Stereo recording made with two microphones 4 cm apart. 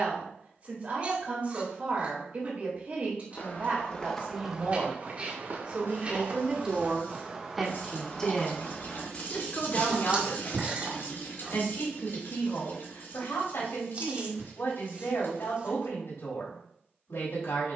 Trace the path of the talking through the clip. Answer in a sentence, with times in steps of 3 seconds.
In this clip you hear the talking on the right from 0 s, in the centre from 6 s and on the left from 9 s.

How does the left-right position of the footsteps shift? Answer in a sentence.
In this clip you hear the footsteps move from left to right and back again.